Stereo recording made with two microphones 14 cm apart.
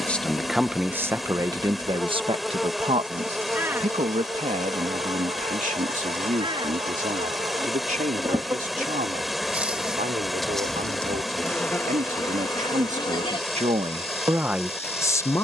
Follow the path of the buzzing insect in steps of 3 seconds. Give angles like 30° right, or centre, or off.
20° left, 30° right, 30° right, centre, 30° left.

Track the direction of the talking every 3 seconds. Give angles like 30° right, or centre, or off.
20° right, 60° right, 70° right, 70° right, 40° right.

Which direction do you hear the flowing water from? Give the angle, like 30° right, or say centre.
centre.